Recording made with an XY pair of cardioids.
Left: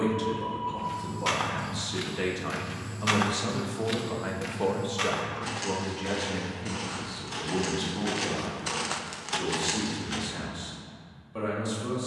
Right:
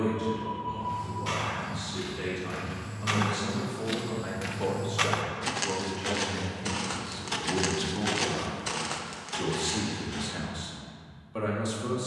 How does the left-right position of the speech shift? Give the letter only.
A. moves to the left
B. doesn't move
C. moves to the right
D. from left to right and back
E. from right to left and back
C.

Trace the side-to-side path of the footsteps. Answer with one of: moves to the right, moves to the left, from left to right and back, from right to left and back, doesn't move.
from left to right and back.